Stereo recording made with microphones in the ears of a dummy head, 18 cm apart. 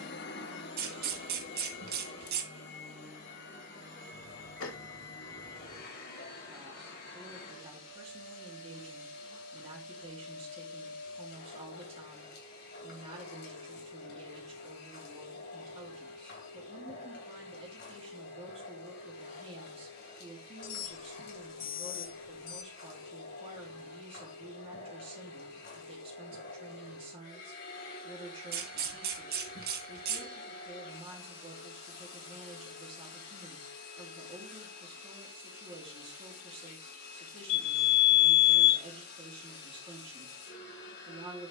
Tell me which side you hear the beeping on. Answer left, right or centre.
left.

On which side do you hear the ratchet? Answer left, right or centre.
right.